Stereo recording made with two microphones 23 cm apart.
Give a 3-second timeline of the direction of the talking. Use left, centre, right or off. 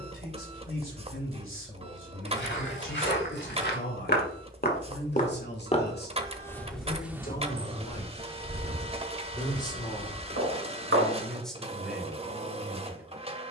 left, left, left, centre, centre.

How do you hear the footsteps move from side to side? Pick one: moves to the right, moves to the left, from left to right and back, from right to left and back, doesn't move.
moves to the right.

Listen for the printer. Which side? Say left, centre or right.
right.